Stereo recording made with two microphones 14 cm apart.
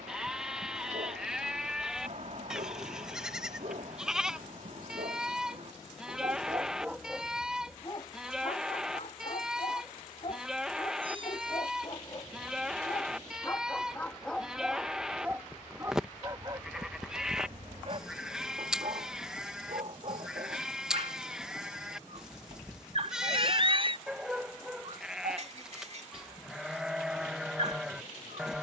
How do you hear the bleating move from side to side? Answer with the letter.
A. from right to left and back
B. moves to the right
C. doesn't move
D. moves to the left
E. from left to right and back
C.